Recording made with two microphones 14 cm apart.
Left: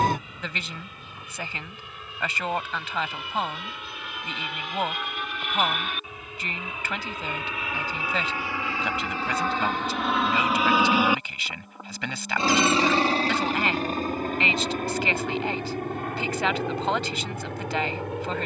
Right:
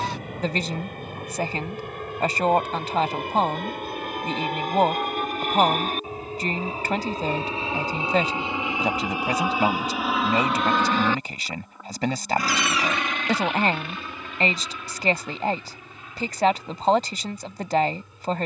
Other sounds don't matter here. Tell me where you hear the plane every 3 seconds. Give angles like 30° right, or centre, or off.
60° right, 50° right, 30° right, centre, 30° left, 50° left.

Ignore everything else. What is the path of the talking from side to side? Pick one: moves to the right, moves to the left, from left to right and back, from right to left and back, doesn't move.
doesn't move.